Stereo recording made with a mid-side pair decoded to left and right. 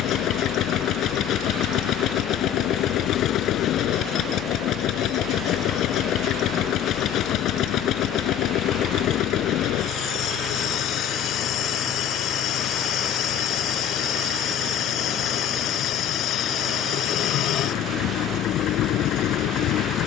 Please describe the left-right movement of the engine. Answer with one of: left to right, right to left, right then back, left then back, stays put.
stays put.